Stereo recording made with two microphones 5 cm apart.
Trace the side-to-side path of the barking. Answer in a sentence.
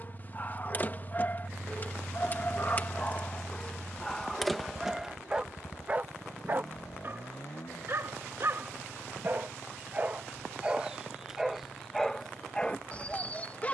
You can hear the barking go right and come back.